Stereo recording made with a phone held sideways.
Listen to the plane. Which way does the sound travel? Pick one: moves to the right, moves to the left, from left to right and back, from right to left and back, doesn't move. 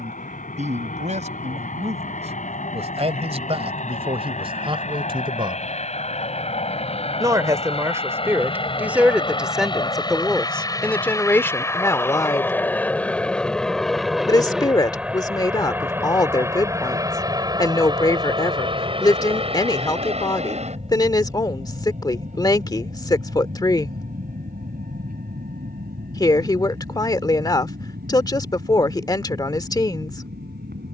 moves to the right.